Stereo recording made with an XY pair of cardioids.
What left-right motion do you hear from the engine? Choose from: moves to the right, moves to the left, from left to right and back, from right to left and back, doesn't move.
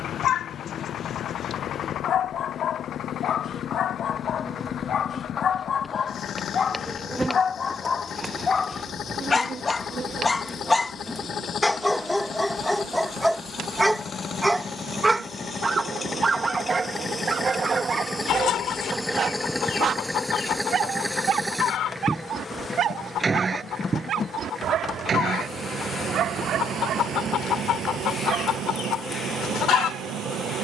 moves to the right.